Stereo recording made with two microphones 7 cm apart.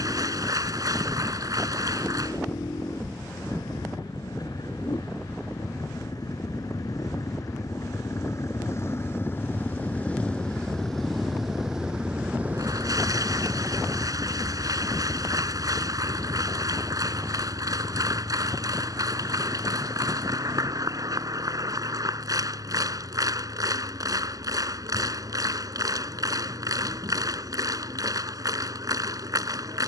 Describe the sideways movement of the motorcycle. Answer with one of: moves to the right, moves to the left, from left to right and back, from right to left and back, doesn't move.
moves to the right.